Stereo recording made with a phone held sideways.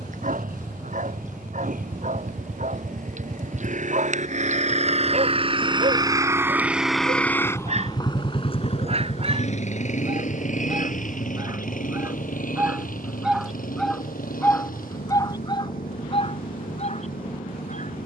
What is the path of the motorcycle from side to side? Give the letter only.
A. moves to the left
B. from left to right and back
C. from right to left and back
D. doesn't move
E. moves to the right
A.